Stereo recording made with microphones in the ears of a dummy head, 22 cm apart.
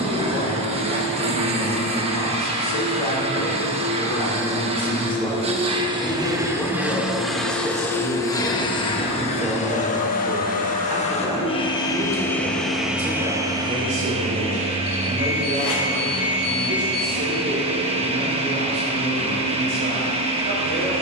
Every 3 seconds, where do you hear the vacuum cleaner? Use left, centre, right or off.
right, right, centre, left, centre, right, right.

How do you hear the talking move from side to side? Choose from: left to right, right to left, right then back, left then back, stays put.
left to right.